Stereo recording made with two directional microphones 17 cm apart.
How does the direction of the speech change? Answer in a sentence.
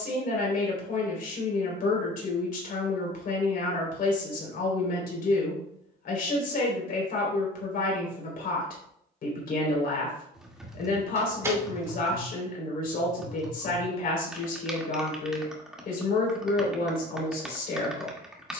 In this clip you hear the speech stay in one place.